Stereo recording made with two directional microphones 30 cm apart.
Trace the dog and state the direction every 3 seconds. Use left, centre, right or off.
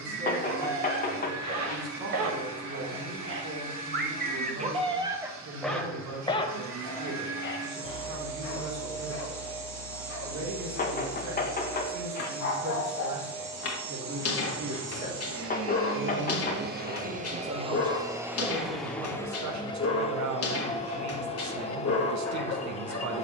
right, right, left, left, left, left, left, left.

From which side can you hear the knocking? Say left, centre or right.
left.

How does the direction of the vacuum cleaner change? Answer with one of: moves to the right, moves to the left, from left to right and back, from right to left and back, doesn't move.
moves to the left.